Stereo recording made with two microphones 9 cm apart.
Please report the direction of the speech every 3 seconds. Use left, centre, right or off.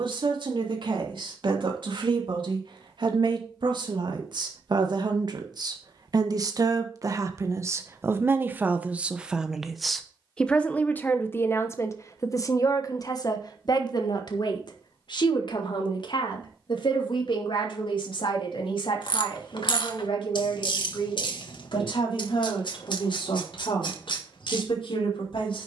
right, right, right, centre, left, left, left, left, left.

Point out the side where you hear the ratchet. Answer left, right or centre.
left.